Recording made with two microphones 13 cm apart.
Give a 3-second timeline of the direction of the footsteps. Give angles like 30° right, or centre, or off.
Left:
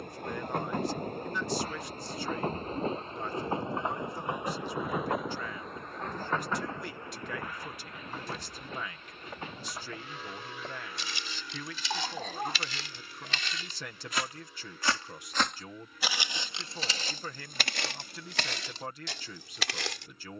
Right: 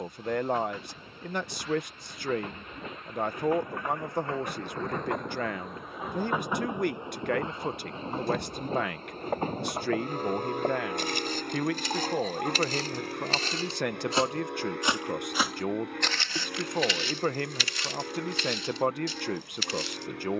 off, off, 60° right, 50° right, 40° right, 30° left, 70° left.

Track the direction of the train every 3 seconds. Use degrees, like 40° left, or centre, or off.
50° left, 10° left, 20° right, 50° right, 60° right, 60° right, 70° right.